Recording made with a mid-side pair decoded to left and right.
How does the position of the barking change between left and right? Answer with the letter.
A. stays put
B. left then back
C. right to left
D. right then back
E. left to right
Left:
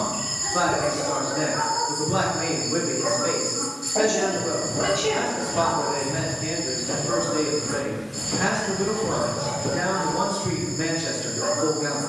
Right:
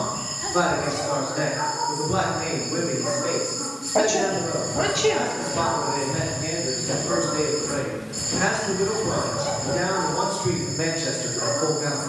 E.